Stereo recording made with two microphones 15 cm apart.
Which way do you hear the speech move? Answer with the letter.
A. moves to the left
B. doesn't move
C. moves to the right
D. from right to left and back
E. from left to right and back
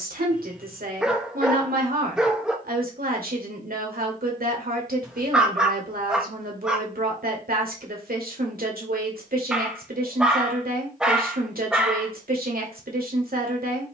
B.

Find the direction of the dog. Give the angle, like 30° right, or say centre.
centre.